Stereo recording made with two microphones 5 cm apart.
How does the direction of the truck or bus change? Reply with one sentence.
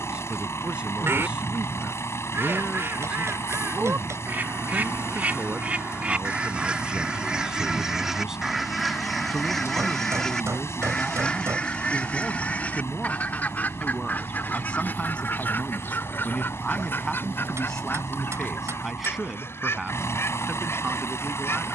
You can hear the truck or bus stay put.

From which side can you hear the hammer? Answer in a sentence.
In this clip you hear the hammer on the right.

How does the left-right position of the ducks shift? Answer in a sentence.
In this clip you hear the ducks go from the right side to the left.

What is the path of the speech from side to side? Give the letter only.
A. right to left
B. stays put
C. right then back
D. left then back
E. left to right
D.